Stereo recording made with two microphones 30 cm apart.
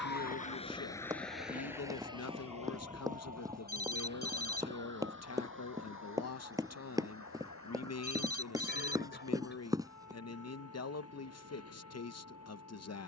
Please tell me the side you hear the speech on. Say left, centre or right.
left.